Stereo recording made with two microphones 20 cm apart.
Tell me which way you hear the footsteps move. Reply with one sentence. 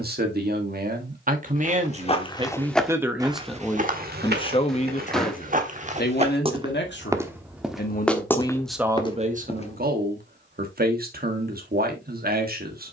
You can hear the footsteps go right and come back.